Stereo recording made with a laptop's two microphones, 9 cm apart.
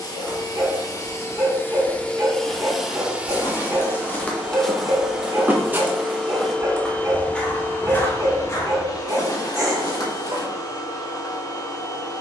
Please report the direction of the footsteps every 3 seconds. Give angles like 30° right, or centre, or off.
40° left, centre, 10° left, 40° left.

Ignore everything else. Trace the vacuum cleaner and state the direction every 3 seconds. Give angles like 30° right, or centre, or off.
20° left, 10° right, 20° left, 40° left.